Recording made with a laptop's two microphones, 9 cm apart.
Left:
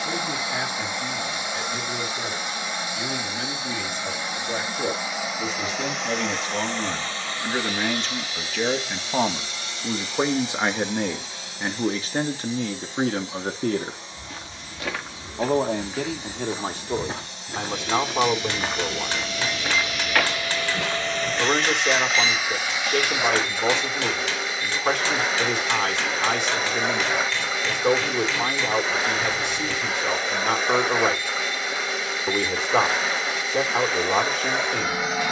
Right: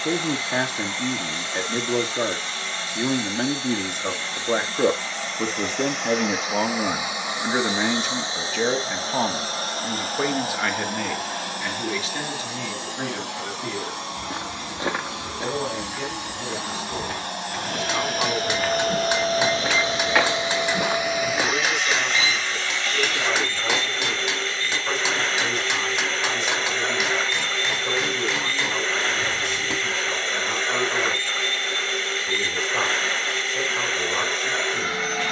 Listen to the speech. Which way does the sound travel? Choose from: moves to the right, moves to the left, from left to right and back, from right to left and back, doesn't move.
moves to the left.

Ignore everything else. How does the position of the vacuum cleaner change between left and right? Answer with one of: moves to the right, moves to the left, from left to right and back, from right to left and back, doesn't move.
from left to right and back.